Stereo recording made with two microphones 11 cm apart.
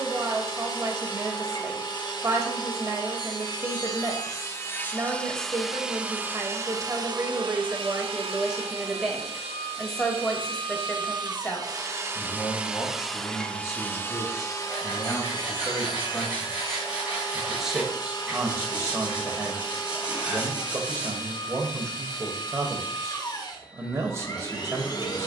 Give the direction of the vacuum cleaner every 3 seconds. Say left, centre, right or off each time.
left, left, right, right, centre, left, left, left, left.